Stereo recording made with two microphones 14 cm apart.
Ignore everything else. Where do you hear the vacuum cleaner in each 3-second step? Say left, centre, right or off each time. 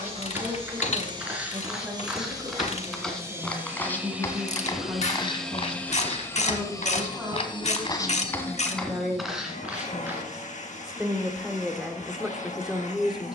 right, centre, left, left, left.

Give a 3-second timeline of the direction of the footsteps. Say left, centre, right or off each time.
centre, left, left, centre, off.